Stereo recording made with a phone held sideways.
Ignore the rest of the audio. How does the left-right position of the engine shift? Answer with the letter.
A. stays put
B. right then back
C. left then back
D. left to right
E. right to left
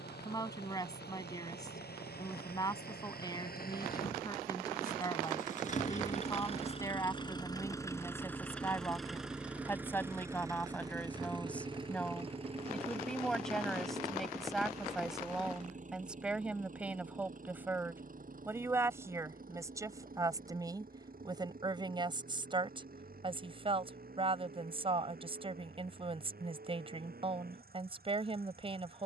D.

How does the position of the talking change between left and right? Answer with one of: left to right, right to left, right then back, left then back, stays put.
left to right.